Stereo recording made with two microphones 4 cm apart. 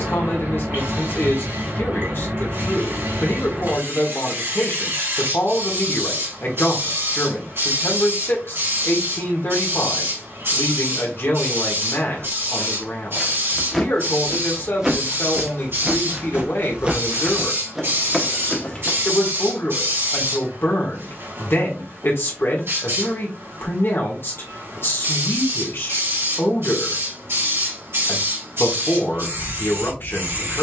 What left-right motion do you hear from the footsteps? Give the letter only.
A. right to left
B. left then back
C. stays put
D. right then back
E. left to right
D.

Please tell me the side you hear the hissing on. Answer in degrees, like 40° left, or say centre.
70° right.